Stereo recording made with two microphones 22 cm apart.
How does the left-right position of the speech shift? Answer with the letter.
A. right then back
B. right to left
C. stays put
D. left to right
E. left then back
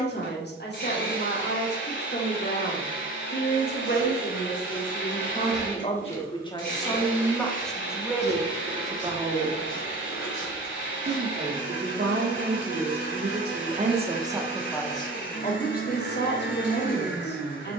A.